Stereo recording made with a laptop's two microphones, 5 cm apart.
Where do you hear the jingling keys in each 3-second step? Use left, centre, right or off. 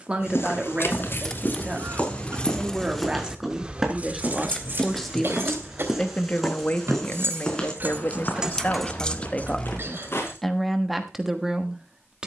left, right, right, left.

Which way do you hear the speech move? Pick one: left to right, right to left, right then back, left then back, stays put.
left then back.